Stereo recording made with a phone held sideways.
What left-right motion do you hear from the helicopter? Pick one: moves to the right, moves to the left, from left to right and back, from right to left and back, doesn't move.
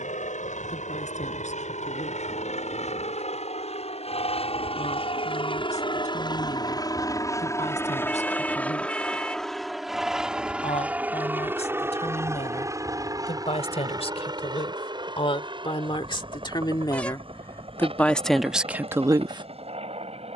moves to the right.